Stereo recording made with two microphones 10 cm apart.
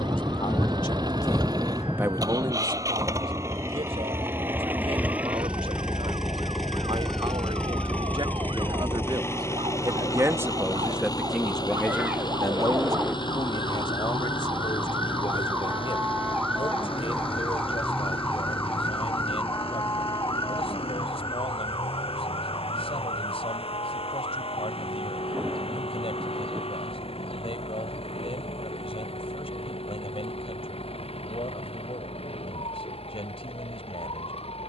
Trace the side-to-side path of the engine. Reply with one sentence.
In this clip you hear the engine move from right to left.